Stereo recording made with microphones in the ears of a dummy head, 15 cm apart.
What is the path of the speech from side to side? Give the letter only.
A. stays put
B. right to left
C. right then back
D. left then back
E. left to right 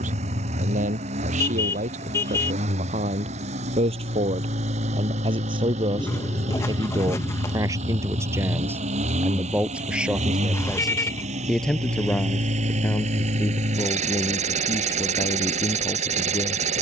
B.